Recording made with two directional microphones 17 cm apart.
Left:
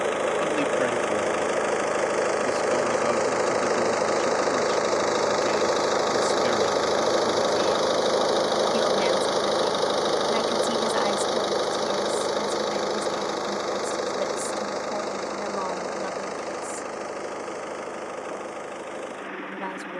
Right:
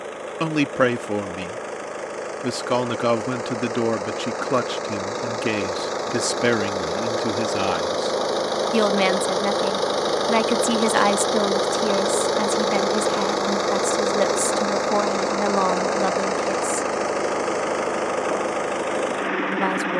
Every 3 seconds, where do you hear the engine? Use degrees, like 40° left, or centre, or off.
40° left, 30° left, 10° left, 10° right, 30° right, 50° right, 60° right.